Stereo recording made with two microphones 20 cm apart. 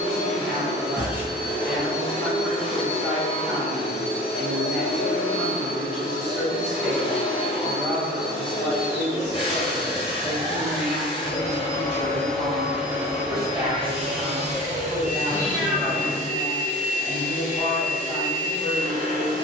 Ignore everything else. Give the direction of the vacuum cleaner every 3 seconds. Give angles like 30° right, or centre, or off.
30° left, 30° left, 30° left, 30° left, 20° right, 40° right, 40° right.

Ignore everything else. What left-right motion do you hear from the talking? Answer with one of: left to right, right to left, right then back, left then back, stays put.
stays put.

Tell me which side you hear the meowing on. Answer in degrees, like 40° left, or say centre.
10° right.